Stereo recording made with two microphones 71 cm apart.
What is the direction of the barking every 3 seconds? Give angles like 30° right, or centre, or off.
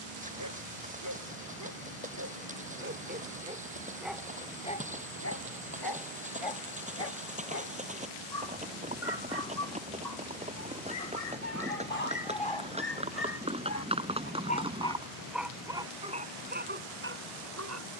20° right, 10° left, 60° left, 70° left, 30° left, 10° right.